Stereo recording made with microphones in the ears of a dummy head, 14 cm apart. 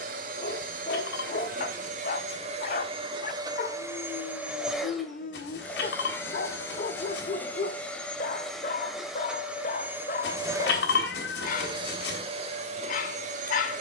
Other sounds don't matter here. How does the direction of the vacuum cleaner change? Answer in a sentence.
In this clip you hear the vacuum cleaner go left and come back.